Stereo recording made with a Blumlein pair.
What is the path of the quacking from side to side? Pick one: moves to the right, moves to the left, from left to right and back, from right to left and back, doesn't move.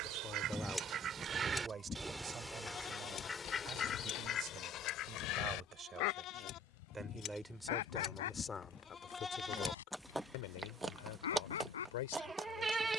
moves to the left.